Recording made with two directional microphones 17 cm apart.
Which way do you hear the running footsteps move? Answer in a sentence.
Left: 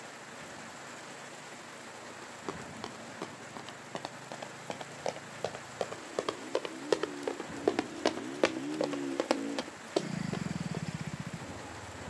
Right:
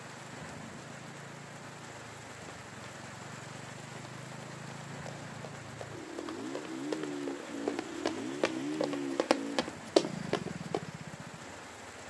You can hear the running footsteps travel towards the right.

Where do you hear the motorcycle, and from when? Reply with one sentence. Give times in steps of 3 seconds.
In this clip you hear the motorcycle on the right from 0 s and on the left from 9 s.